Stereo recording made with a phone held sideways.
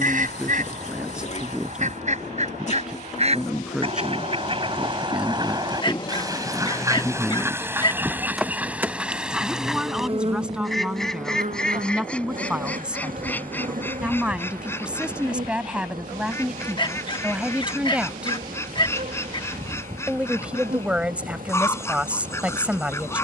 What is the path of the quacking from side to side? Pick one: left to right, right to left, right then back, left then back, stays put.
right to left.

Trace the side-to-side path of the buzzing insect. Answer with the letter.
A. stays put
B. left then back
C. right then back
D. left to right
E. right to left
D.